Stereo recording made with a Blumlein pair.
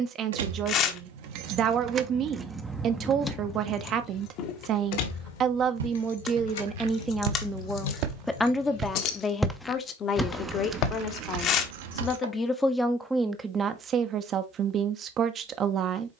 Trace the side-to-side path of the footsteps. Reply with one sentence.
You can hear the footsteps move from right to left.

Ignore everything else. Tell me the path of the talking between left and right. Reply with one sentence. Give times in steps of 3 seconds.
You can hear the talking on the right from 0 s, in the centre from 6 s, on the left from 9 s, in the centre from 12 s and on the right from 15 s.